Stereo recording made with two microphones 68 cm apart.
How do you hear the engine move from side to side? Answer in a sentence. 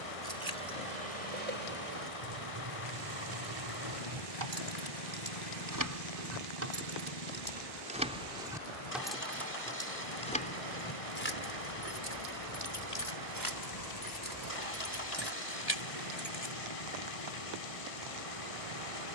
You can hear the engine stay put.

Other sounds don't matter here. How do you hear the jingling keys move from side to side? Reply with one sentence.
You can hear the jingling keys travel towards the left.